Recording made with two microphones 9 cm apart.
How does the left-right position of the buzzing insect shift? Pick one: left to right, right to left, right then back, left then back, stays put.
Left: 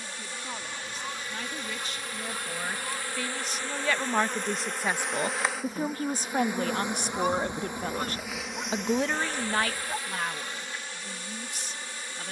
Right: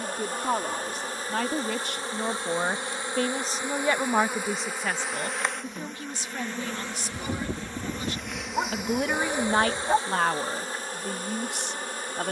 left then back.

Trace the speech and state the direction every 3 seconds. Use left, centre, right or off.
right, centre, left, right.